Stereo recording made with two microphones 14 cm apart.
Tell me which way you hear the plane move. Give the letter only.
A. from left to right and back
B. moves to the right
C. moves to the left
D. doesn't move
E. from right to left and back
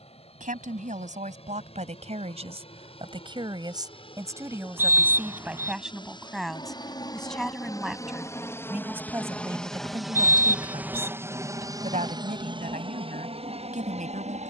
B.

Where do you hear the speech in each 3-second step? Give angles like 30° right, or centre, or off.
60° right, 20° right, centre, 30° right, 70° right.